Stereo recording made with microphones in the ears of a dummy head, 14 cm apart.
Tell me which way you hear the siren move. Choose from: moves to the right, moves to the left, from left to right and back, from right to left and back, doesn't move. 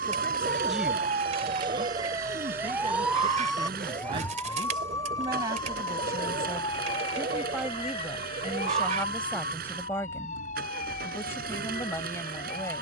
moves to the left.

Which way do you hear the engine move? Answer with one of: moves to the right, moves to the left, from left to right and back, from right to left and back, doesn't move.
doesn't move.